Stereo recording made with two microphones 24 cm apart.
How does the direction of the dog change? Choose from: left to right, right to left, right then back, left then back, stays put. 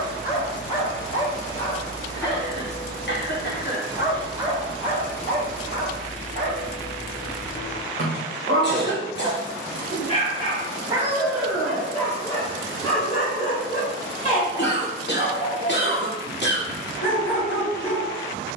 right then back.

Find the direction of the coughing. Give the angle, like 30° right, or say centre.
50° left.